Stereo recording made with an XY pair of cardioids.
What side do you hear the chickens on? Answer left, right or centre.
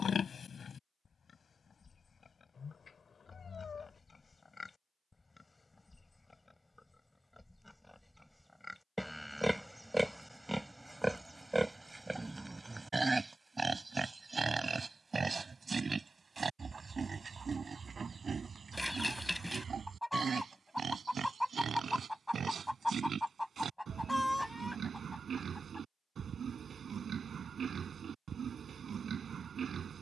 centre.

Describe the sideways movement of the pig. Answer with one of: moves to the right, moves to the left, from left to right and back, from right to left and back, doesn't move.
moves to the right.